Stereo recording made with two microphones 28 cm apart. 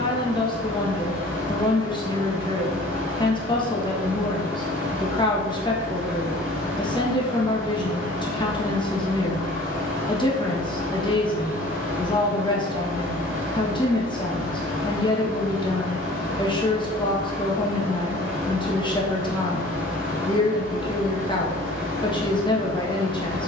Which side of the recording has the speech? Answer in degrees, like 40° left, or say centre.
20° left.